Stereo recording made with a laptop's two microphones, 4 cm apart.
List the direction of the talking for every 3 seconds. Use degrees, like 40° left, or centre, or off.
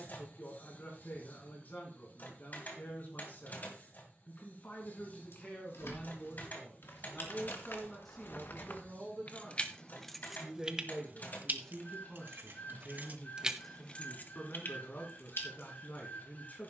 50° left, 40° left, 10° left, centre, 30° left, 40° left.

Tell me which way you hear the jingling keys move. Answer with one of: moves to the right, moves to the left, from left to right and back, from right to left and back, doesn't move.
from left to right and back.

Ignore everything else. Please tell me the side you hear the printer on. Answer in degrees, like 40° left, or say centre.
40° left.